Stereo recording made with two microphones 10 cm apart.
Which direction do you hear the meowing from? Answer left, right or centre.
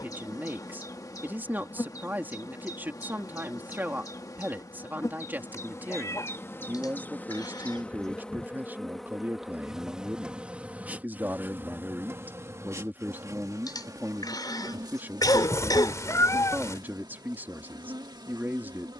left.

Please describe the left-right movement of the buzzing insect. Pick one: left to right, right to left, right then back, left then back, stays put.
left to right.